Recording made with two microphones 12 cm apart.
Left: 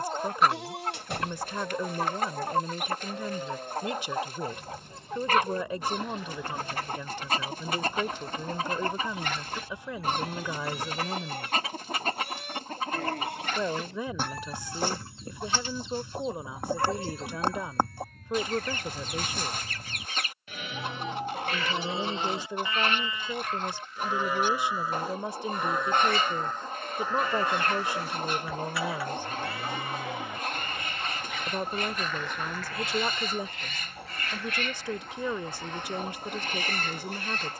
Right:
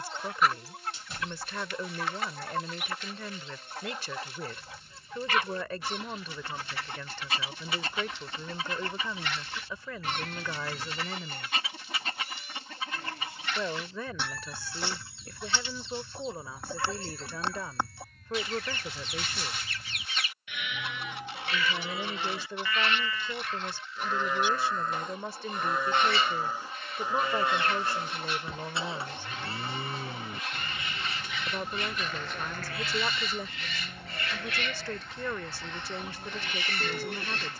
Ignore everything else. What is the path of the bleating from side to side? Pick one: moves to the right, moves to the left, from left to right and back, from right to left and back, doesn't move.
moves to the right.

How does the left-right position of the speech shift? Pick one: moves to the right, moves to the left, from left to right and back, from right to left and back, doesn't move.
doesn't move.